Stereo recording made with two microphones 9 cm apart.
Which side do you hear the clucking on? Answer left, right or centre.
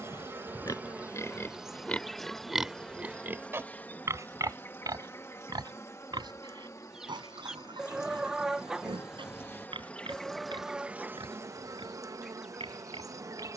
centre.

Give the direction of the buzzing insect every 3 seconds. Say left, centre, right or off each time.
centre, left, left, centre, right.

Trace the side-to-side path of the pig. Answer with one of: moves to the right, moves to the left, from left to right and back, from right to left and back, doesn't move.
moves to the right.